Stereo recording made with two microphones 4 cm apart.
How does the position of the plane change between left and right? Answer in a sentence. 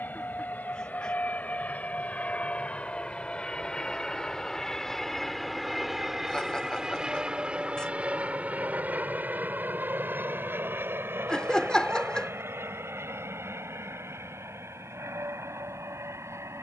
In this clip you hear the plane move to the right.